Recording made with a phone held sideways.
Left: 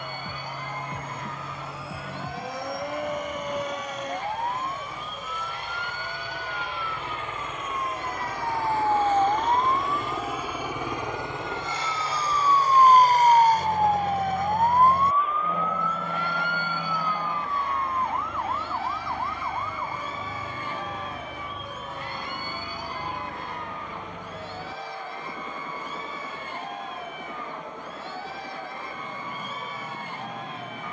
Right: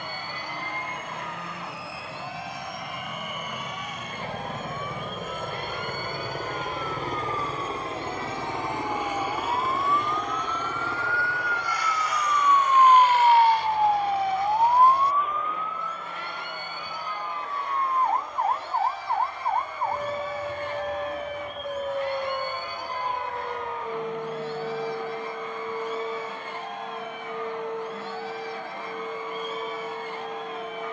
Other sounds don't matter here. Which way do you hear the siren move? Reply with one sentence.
In this clip you hear the siren go from the left side to the right.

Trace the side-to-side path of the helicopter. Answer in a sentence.
You can hear the helicopter go from the right side to the left.